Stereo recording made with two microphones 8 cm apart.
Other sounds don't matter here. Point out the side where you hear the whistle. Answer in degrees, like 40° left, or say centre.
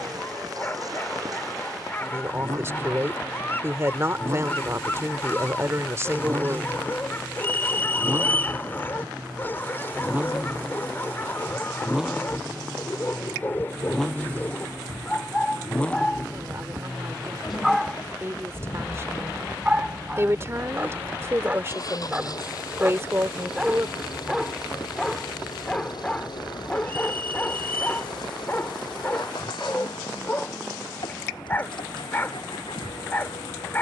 20° left.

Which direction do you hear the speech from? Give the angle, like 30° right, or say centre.
30° right.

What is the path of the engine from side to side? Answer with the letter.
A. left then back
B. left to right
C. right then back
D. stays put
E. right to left
E.